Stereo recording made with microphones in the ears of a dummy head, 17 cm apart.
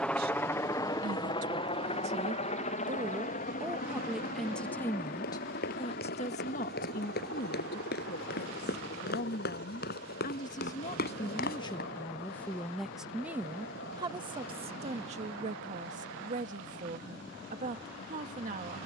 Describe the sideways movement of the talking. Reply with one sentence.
In this clip you hear the talking move from right to left and back again.